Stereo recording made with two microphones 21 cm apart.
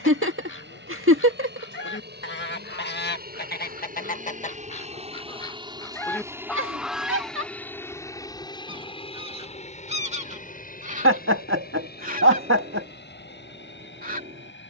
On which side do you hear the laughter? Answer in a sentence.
You can hear the laughter on the right.